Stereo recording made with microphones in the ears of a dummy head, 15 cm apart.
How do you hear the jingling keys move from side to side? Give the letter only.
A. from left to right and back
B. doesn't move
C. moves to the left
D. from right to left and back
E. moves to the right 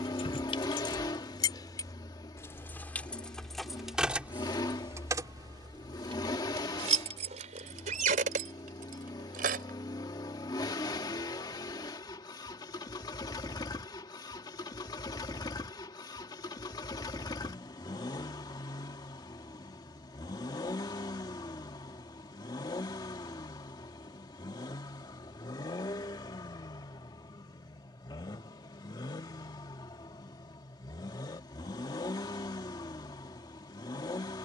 E.